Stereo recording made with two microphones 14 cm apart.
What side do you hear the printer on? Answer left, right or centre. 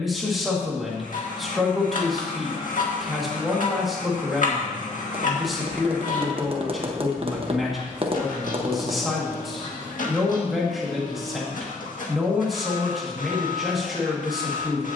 left.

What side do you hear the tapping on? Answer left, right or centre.
right.